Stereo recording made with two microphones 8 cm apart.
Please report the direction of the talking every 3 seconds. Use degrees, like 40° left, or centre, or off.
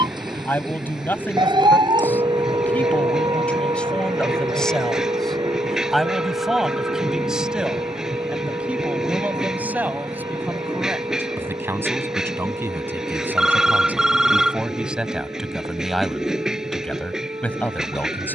20° left, 10° left, 10° right, 20° right, 20° right, 10° left.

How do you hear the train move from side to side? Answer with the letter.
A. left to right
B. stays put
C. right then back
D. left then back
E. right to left
B.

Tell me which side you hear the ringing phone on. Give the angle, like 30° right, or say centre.
10° right.